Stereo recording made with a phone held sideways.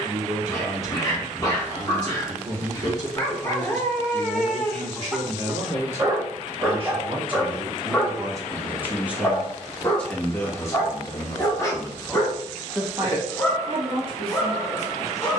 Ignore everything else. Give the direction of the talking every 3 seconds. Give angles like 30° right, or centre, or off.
50° right, 50° right, 30° right, 10° left, 30° right.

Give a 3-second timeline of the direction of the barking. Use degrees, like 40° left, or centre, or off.
30° left, 10° left, centre, 20° left, 20° left.